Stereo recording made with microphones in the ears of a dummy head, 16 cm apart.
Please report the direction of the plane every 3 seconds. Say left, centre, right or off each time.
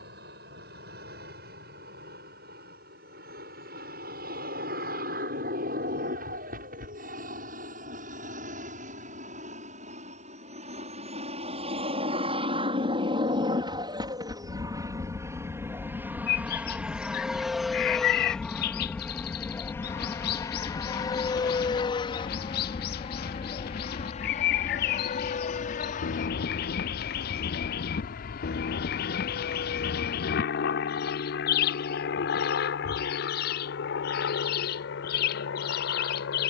right, right, right, right, right, centre, centre, left, left, left, left, left.